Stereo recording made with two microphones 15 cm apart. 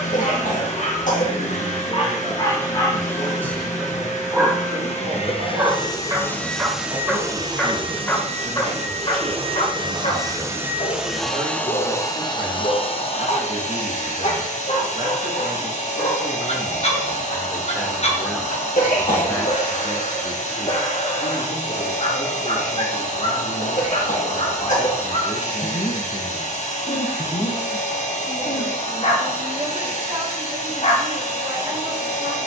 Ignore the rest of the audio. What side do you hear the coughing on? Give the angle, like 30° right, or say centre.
60° left.